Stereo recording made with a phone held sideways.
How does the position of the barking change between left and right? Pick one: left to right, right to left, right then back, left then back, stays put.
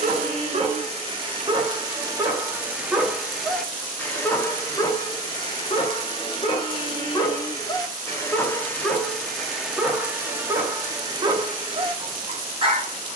left then back.